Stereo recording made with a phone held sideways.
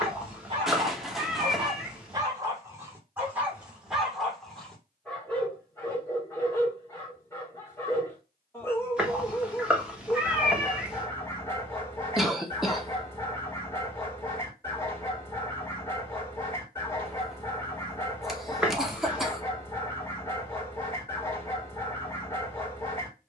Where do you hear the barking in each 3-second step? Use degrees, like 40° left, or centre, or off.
30° right, centre, 20° left, 20° left, 20° left, 20° left, 20° left, 20° left.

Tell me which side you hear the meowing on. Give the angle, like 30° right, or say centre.
10° right.